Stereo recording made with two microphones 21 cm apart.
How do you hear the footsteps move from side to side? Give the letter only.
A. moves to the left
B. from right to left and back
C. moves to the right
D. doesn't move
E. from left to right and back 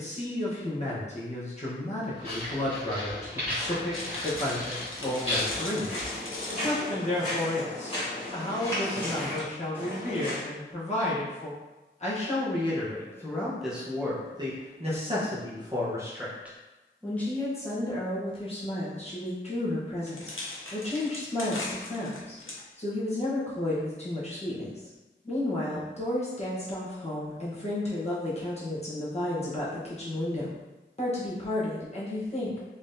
B.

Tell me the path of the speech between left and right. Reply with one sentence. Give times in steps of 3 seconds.
In this clip you hear the speech on the left from 0 s, in the centre from 12 s and on the left from 18 s.